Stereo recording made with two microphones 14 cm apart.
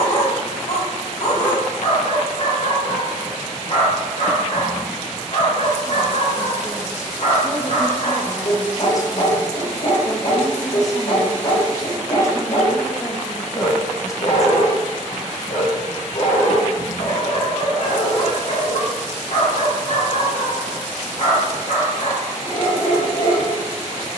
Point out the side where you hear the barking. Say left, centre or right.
left.